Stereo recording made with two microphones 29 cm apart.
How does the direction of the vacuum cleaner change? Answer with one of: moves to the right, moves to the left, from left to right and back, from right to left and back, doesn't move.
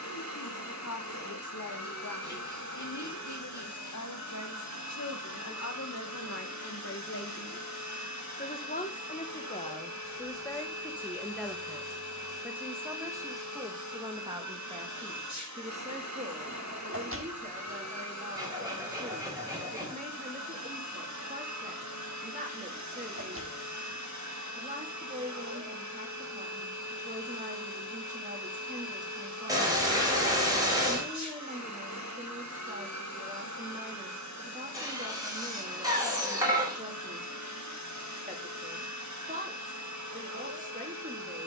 doesn't move.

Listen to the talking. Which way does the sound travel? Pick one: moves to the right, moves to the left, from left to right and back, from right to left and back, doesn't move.
moves to the right.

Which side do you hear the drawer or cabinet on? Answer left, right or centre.
right.